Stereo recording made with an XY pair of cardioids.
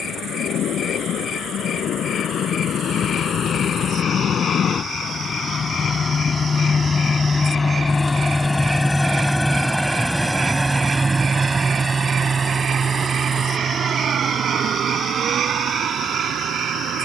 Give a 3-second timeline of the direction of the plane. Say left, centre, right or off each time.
left, left, left, centre, right, right.